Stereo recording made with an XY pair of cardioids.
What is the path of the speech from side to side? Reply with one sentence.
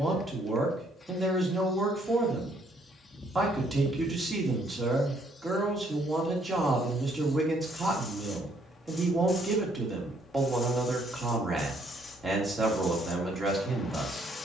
You can hear the speech stay put.